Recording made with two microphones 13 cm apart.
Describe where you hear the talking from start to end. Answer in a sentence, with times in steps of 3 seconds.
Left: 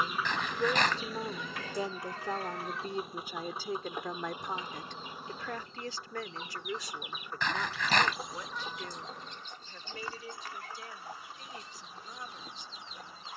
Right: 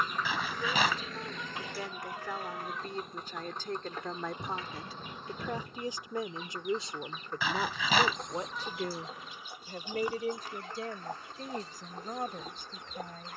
In this clip you hear the talking on the left from 0 s, in the centre from 3 s and on the right from 6 s.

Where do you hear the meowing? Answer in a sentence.
In this clip you hear the meowing in the centre.